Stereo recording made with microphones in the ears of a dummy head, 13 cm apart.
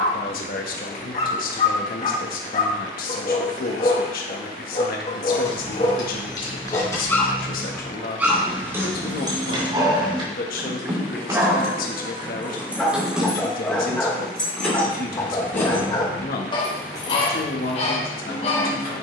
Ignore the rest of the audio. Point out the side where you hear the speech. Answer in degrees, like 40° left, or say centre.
60° left.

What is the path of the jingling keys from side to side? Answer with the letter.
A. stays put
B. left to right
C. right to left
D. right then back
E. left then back
D.